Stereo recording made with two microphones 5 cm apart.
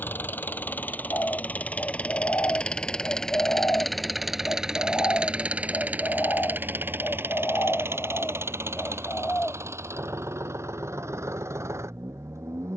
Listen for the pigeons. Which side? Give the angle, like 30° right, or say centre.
40° left.